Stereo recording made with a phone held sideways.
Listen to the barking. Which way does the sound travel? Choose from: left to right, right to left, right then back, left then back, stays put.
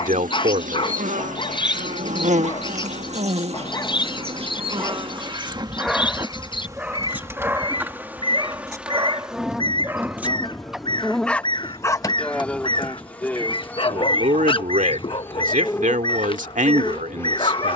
right then back.